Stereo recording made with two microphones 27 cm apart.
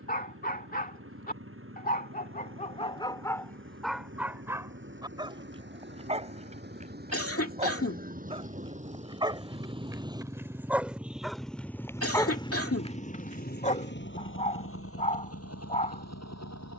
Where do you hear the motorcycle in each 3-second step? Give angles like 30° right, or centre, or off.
50° right, 50° right, 30° right, 10° right, 30° left, 60° left.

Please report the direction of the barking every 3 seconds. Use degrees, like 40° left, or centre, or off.
30° left, centre, 20° right, 10° right, 20° left, 30° left.